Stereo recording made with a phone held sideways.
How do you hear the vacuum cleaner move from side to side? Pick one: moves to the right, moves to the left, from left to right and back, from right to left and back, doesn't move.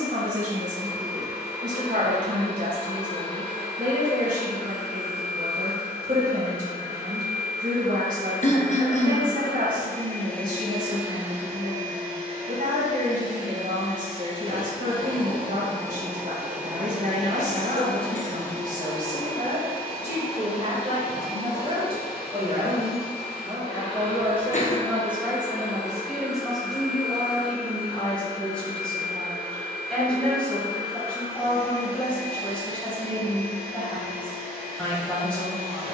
from left to right and back.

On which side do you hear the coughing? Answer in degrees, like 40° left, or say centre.
50° left.